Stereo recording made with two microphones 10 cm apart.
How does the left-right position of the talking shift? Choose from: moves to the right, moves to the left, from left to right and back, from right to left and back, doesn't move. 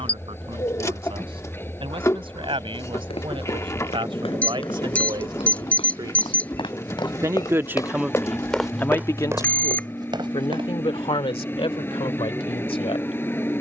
moves to the left.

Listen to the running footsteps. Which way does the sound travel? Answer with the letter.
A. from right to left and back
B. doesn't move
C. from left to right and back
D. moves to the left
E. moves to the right
E.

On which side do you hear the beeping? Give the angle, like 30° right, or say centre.
10° left.